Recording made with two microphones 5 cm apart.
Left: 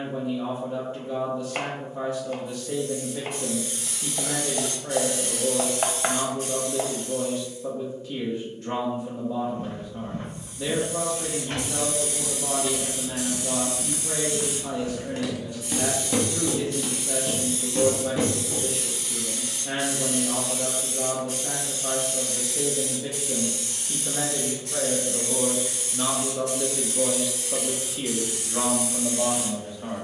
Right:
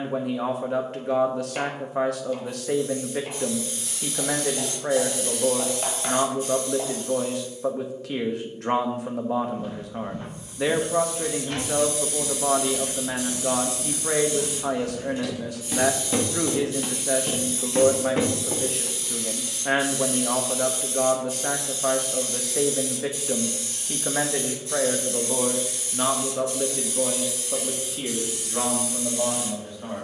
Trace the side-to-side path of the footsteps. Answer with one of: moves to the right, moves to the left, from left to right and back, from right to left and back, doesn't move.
moves to the right.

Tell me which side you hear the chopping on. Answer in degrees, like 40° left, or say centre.
50° left.